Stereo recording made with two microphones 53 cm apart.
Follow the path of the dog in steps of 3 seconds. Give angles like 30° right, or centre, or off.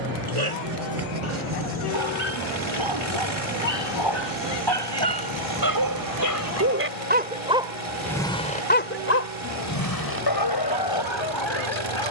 70° right, 50° right, 10° right, 50° left.